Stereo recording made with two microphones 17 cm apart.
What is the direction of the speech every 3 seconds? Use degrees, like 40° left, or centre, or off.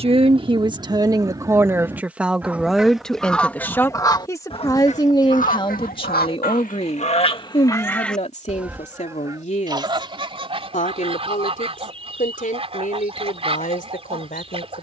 20° right, 20° left, 40° left, 50° left, 60° left.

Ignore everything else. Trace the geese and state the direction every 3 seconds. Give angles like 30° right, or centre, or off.
20° right, 30° left, 30° left, 30° right, 40° right.